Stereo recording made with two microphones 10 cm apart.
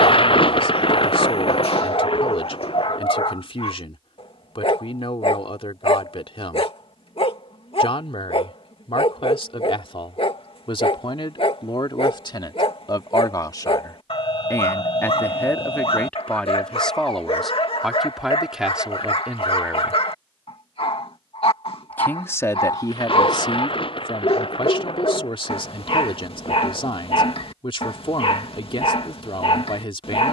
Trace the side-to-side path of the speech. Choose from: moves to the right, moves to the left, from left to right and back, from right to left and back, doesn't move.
from left to right and back.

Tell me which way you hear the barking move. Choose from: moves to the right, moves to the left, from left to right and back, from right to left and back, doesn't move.
doesn't move.